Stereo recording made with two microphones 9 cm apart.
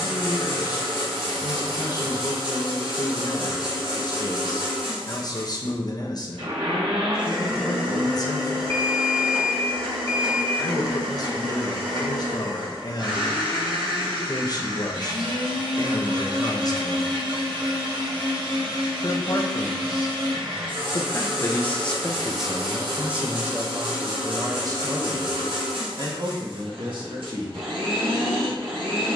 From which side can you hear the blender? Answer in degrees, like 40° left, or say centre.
80° right.